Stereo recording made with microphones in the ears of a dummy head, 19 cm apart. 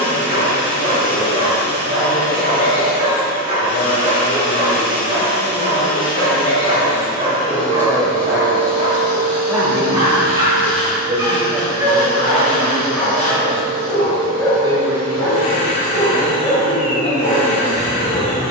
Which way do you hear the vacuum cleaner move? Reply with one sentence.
In this clip you hear the vacuum cleaner stay put.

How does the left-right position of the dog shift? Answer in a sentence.
You can hear the dog move to the left.